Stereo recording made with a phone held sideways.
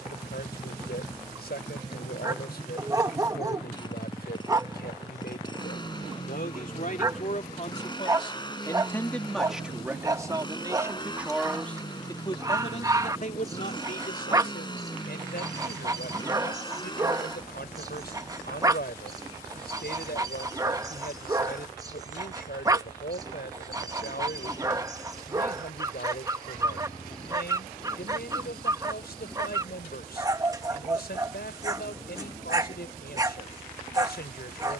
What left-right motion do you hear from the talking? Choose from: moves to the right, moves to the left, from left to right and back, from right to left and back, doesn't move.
from left to right and back.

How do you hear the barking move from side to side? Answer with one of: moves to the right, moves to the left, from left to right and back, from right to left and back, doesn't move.
doesn't move.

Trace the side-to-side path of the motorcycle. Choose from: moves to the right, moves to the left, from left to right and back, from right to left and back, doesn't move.
doesn't move.